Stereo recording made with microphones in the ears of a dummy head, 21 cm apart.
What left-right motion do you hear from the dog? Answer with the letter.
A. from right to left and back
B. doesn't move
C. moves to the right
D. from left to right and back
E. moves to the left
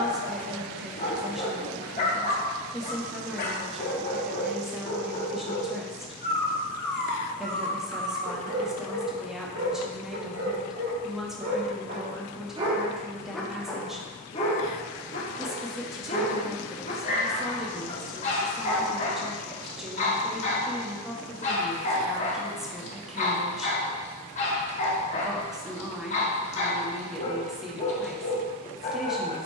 D.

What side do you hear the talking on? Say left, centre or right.
centre.